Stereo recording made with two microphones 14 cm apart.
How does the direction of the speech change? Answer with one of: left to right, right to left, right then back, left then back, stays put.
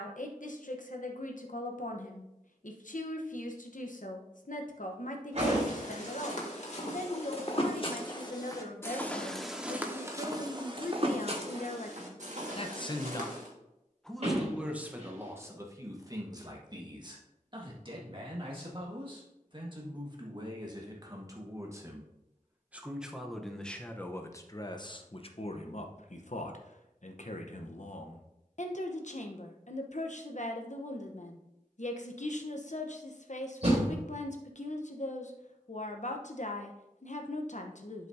right then back.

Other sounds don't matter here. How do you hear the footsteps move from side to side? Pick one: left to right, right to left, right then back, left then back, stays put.
left to right.